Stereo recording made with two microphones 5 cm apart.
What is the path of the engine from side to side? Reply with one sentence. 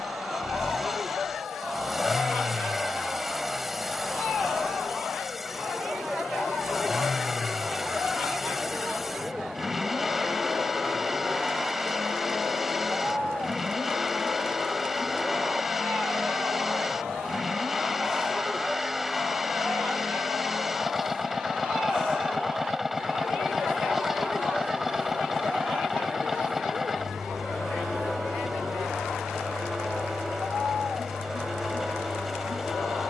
In this clip you hear the engine stay in one place.